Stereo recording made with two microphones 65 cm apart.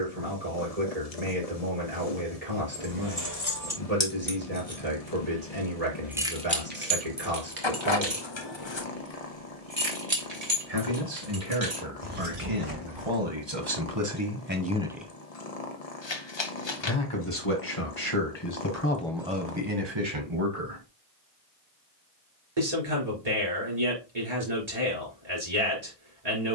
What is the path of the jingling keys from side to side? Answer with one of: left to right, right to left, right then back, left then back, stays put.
left to right.